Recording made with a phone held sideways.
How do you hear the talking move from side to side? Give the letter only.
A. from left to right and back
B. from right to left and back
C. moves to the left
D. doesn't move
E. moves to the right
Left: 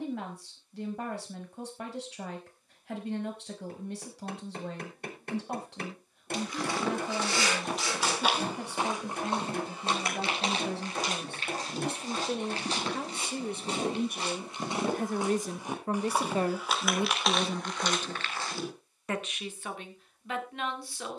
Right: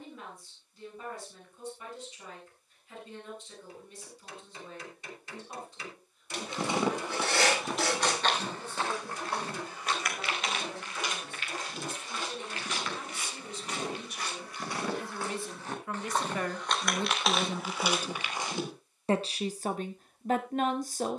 E.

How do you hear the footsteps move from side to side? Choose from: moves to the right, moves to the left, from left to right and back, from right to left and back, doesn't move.
from right to left and back.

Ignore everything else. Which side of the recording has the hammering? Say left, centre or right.
left.